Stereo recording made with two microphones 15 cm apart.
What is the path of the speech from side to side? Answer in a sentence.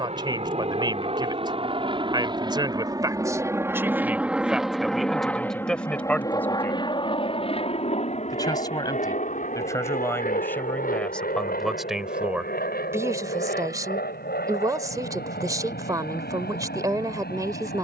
You can hear the speech go left and come back.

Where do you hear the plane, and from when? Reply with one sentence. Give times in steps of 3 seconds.
In this clip you hear the plane on the right from 0 s, in the centre from 3 s and on the left from 6 s.